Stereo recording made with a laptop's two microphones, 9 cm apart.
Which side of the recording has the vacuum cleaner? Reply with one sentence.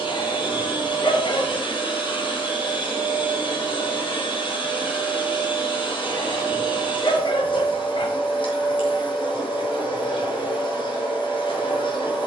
In this clip you hear the vacuum cleaner on the left.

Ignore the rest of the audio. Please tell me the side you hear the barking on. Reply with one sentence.
In this clip you hear the barking on the left.